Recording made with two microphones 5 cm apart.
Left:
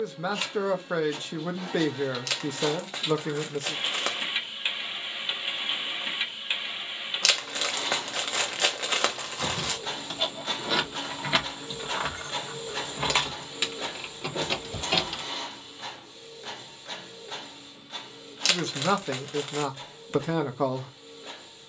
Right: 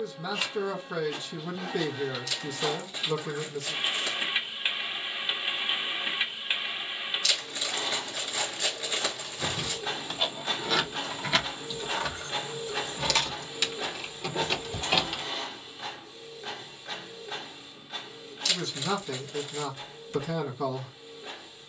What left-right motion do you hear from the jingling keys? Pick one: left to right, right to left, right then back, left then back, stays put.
left then back.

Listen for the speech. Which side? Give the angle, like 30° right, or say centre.
50° left.